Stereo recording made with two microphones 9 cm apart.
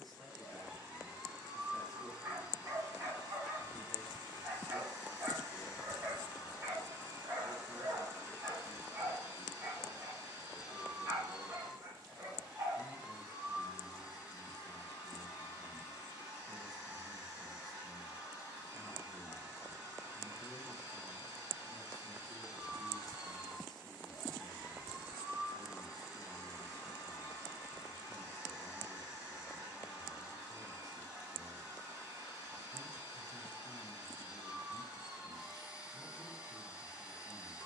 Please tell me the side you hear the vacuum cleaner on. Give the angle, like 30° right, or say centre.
20° right.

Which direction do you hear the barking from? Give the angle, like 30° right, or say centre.
40° right.